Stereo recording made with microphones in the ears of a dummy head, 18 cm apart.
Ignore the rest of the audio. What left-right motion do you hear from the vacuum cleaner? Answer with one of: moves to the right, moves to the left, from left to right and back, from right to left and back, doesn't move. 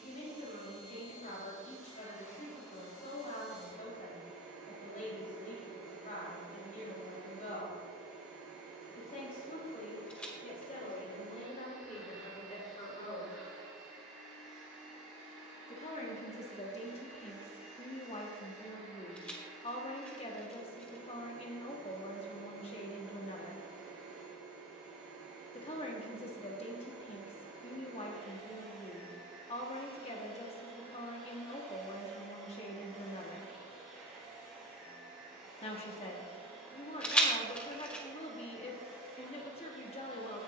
doesn't move.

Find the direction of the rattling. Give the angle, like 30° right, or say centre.
10° left.